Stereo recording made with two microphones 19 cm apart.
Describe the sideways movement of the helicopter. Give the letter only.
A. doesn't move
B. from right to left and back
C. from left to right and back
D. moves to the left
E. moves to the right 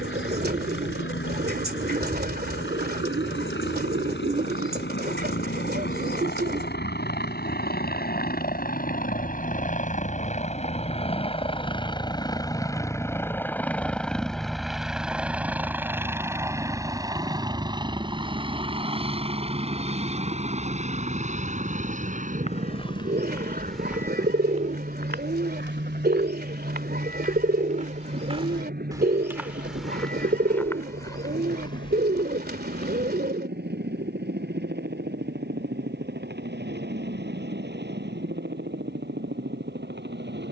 E.